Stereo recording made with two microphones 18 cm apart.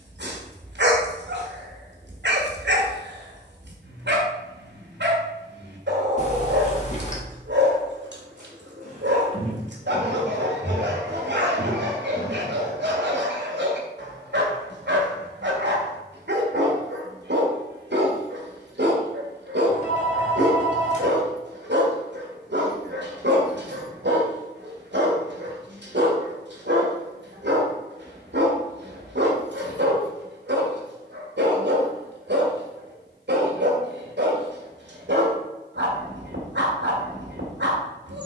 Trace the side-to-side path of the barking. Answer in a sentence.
In this clip you hear the barking stay in one place.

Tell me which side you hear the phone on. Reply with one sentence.
In this clip you hear the phone on the left.